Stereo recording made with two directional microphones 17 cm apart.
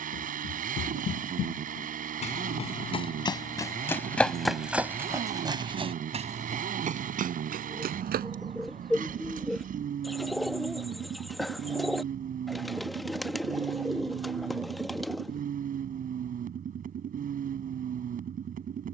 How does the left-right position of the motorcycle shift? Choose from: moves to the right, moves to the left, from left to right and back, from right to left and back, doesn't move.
doesn't move.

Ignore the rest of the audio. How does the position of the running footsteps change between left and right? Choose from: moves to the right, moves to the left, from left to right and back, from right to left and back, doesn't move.
moves to the right.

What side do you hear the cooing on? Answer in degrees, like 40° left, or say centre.
centre.